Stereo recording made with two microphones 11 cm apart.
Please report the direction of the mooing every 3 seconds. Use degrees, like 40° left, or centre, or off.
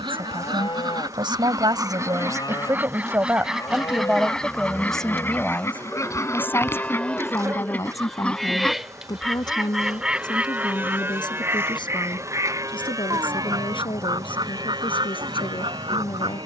40° left, 30° left, 10° left, 20° right, 40° right, 50° right.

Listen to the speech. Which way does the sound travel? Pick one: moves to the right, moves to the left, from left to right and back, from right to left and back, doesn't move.
moves to the left.